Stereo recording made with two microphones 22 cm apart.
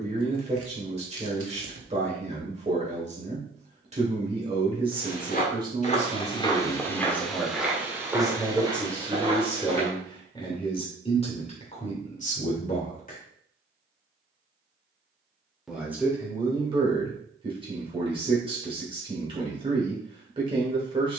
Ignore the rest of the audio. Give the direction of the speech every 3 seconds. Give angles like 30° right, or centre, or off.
30° right, 20° right, 10° right, 20° left, 40° left, 20° right, 20° right.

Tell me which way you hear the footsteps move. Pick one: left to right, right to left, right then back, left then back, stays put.
left to right.